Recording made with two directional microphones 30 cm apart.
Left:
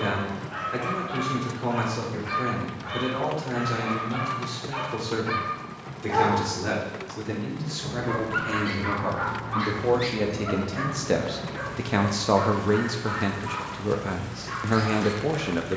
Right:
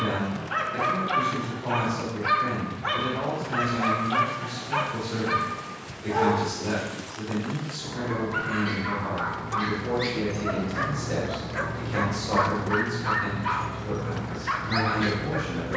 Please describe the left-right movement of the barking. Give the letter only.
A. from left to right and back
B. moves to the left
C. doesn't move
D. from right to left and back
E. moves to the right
D.